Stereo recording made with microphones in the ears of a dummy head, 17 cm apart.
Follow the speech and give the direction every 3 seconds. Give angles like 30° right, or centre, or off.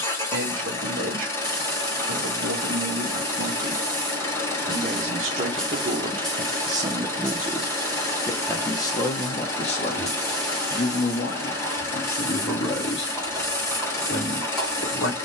60° right, 40° right, 10° right, 40° left, 60° left.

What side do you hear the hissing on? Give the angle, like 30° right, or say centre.
centre.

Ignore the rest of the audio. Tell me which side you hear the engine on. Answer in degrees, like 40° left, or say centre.
10° left.